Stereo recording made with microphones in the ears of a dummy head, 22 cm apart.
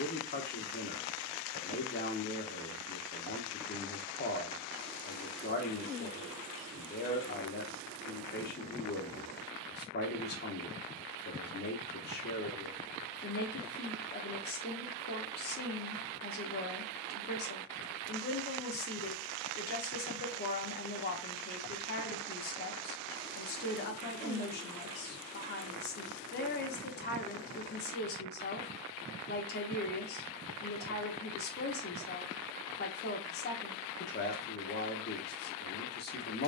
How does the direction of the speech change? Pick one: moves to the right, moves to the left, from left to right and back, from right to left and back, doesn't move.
doesn't move.